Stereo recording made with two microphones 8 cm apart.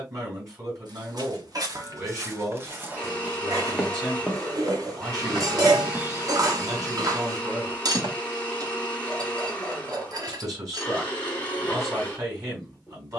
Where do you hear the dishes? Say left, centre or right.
right.